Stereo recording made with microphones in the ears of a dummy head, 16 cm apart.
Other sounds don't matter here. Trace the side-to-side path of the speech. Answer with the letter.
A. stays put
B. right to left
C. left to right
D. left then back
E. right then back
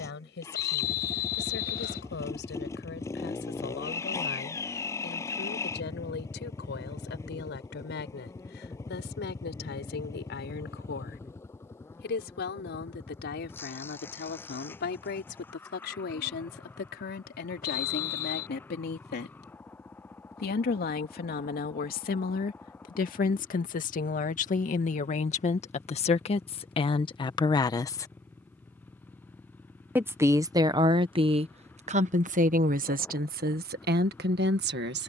C.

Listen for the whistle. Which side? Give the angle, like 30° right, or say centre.
60° left.